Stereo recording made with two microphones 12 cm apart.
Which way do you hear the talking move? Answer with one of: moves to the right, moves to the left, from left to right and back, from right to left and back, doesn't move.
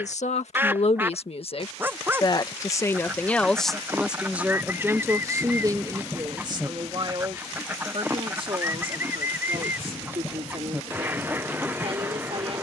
moves to the right.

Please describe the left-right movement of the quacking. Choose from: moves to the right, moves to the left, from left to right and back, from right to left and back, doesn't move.
doesn't move.